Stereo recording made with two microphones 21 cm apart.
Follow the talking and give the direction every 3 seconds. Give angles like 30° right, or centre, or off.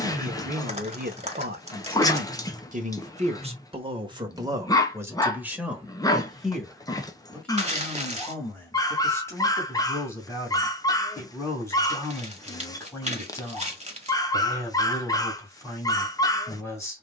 40° right, 20° right, 10° left, 10° left, 10° left, 10° left.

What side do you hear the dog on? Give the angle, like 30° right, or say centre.
20° left.